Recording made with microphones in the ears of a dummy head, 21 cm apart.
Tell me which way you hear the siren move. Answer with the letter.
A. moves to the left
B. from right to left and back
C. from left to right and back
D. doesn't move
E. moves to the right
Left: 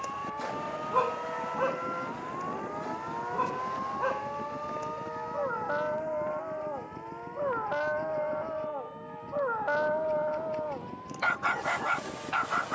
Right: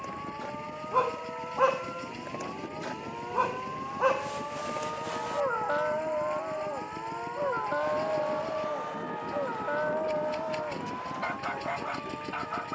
E.